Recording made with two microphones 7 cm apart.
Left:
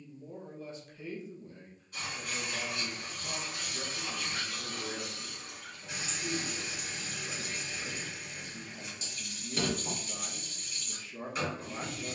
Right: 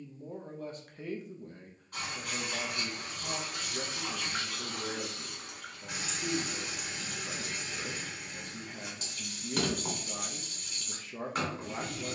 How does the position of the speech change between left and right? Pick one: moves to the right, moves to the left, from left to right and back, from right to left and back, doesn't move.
doesn't move.